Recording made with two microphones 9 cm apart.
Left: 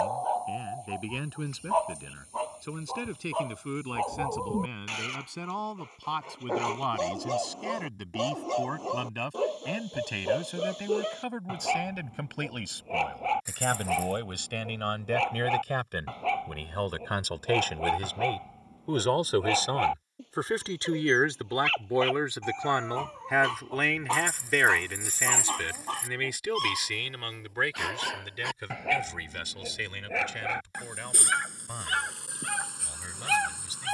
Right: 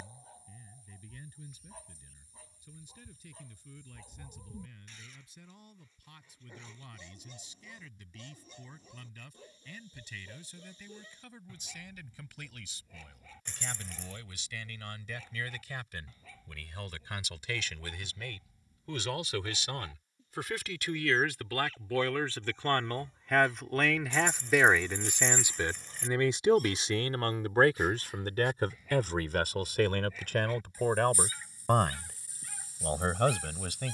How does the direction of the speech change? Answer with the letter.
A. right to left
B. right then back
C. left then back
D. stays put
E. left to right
E.